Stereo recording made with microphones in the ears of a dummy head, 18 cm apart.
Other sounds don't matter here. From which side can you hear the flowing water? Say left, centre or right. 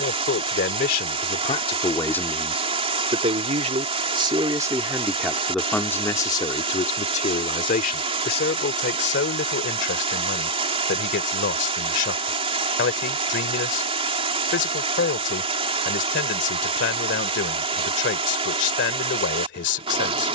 right.